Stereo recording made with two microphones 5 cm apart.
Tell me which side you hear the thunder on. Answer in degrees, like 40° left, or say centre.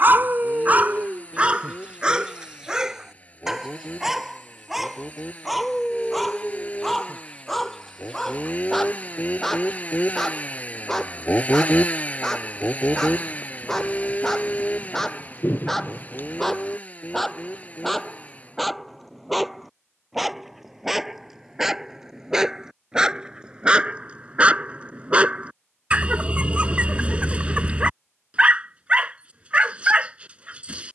40° left.